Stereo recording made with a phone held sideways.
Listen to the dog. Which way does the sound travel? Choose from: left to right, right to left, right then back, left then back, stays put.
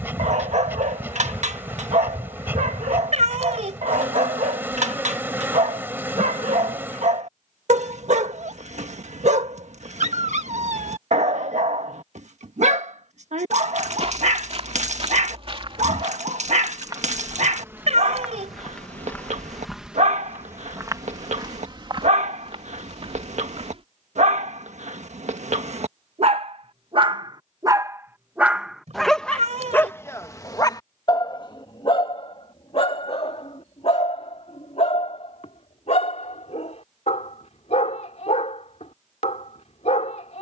right to left.